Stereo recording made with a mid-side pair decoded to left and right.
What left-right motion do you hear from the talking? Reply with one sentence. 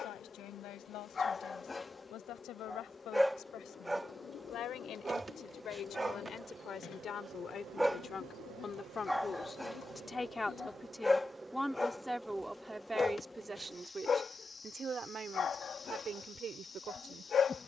You can hear the talking travel towards the right.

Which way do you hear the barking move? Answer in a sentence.
In this clip you hear the barking move from left to right and back again.